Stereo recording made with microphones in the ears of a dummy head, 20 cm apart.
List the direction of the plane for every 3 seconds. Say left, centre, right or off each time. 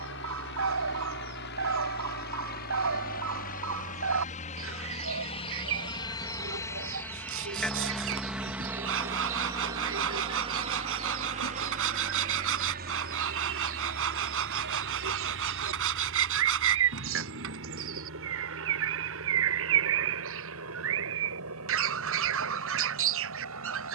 left, left, centre, right, right, right, right, right.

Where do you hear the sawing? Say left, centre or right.
right.